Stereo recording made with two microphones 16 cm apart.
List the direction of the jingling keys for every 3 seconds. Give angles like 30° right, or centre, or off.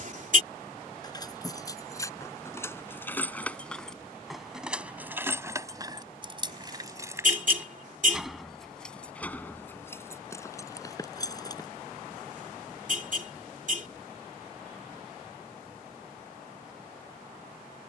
20° left, 10° right, 10° right, 20° left, off, off.